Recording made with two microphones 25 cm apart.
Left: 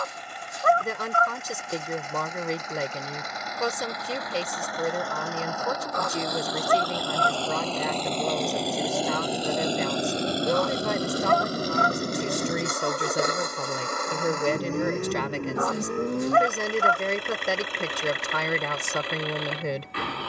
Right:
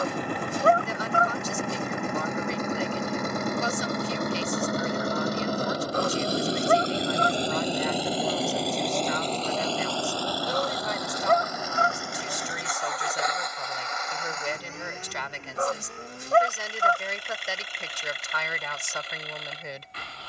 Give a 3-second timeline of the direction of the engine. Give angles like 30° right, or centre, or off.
60° right, 50° right, 20° right, 20° left, 50° left, 60° left, 70° left.